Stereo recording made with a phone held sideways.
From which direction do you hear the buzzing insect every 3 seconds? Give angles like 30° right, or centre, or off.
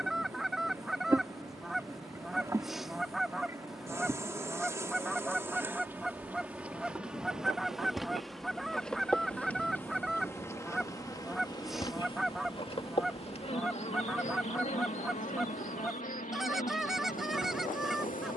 20° right, 20° right, centre, 20° left, 40° left, 60° left.